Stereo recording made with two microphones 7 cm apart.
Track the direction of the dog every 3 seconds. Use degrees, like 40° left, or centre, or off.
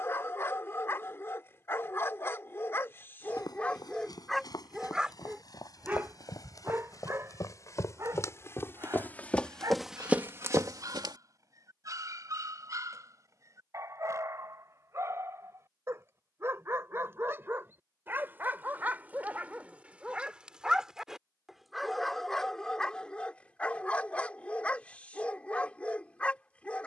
30° left, centre, 40° right, 50° right, 40° right, 30° right, 20° right, 10° left, 20° left.